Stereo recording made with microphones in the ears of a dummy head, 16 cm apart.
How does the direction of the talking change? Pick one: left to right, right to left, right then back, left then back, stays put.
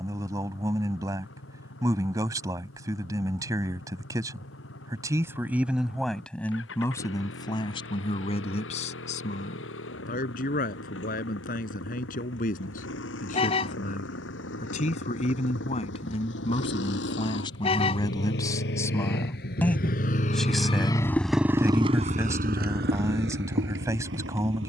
left then back.